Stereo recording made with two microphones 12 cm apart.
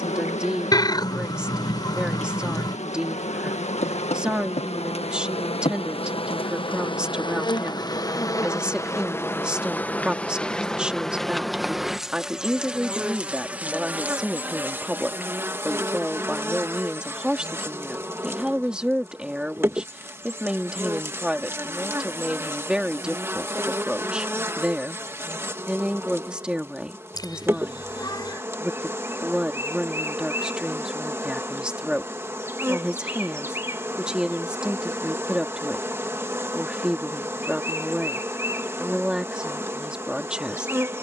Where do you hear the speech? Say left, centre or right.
centre.